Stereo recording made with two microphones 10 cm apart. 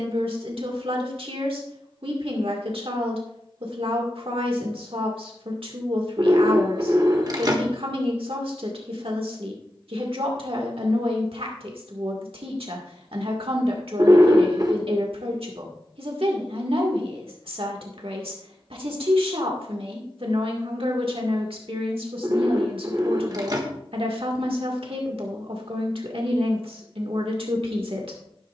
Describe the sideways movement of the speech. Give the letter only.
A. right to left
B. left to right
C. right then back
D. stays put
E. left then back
D.